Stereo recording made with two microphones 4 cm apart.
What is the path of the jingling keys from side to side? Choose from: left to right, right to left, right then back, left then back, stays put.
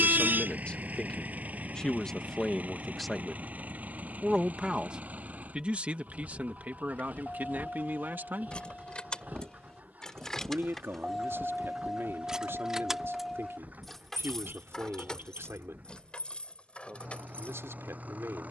right then back.